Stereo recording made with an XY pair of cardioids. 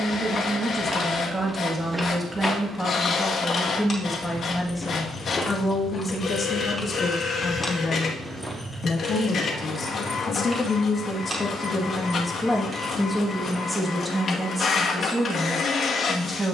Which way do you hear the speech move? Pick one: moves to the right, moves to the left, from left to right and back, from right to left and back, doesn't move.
from right to left and back.